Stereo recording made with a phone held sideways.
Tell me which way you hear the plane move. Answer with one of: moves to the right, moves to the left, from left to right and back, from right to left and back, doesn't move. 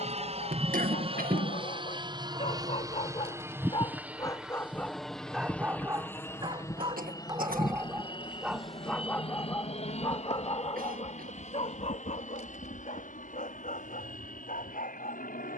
moves to the left.